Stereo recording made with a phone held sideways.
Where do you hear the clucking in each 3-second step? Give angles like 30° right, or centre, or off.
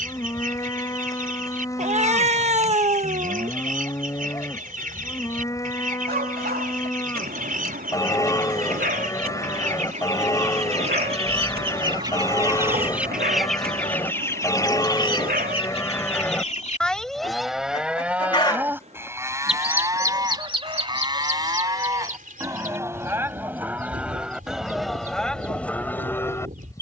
60° right, 60° right, 60° right, 50° right, centre, 40° left, 10° right, 60° right, 60° right.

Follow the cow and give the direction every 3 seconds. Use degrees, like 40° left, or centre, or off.
20° left, 20° left, 20° left, 20° left, 20° left, 10° left, 20° right, 20° right, 10° left.